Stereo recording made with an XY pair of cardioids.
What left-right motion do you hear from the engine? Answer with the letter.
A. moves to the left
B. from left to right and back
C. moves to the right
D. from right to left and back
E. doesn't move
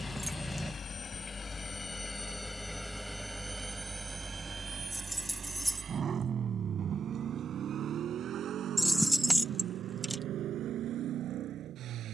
C.